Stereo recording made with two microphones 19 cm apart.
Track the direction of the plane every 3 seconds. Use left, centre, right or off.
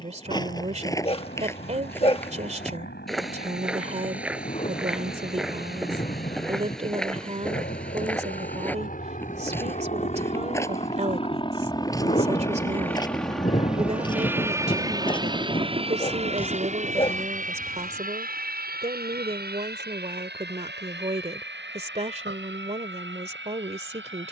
left, left, left, left, centre, right, right, right.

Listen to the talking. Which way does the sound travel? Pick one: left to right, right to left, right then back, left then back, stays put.
stays put.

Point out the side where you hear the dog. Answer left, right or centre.
left.